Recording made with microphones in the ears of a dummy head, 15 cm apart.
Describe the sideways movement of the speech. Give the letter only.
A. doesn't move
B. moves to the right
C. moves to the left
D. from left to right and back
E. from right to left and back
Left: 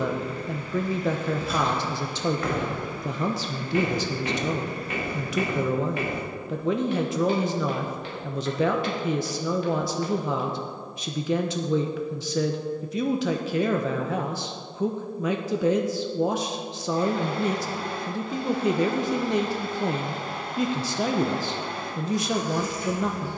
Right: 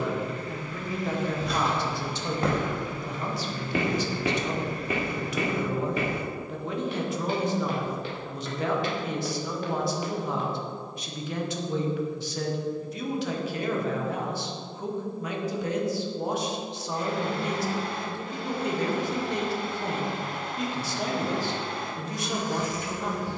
A.